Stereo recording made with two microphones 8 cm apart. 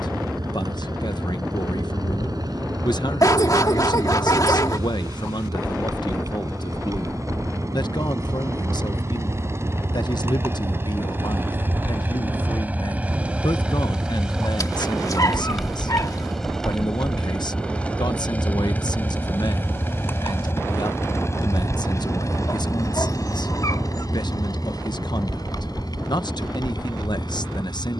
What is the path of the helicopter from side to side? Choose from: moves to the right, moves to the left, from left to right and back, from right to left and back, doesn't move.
moves to the left.